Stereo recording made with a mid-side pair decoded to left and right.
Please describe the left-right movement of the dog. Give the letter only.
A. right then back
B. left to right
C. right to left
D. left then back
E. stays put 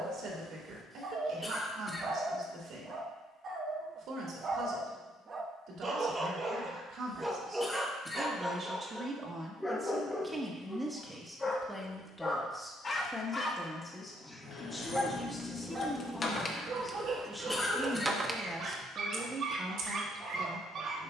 D.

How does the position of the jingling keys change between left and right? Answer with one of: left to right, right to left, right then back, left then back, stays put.
left to right.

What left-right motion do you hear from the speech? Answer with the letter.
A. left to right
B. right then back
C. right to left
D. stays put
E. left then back
E.